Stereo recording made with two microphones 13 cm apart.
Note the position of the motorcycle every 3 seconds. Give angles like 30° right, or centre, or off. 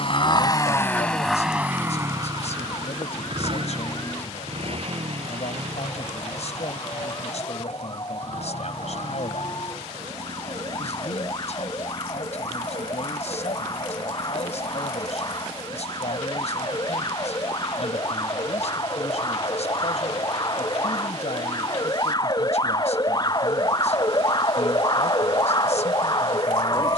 centre, 50° right, 60° right, 70° right, 70° right, 70° right, 70° right, 70° right, 70° right.